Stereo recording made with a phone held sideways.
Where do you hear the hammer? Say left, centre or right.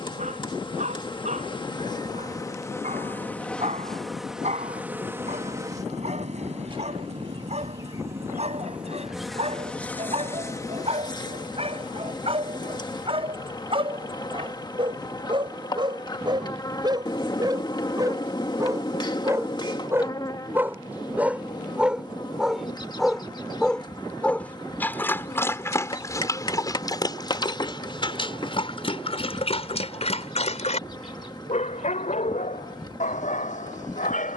left.